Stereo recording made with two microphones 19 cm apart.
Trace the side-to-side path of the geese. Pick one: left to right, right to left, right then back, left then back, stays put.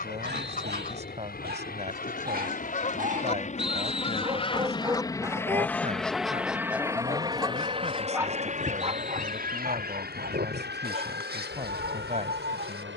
left to right.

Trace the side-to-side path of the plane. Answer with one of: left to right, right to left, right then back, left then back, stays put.
left to right.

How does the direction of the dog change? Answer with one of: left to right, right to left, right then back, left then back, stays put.
left then back.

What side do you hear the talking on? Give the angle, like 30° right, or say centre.
40° right.